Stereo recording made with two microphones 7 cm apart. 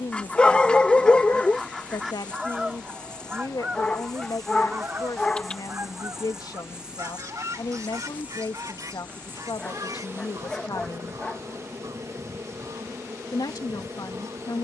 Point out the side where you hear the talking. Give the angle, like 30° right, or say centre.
80° left.